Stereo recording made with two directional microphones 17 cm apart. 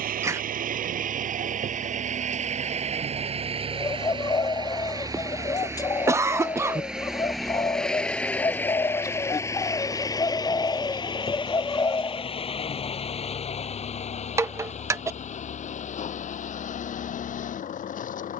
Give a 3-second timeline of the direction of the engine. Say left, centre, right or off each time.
right, right, centre, left, left, left.